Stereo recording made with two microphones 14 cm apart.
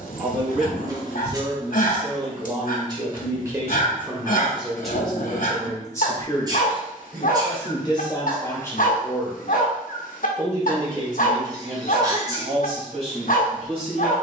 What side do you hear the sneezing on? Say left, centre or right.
right.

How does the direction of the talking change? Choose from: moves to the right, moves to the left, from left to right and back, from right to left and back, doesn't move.
from right to left and back.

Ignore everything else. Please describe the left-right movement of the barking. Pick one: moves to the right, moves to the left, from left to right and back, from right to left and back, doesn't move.
doesn't move.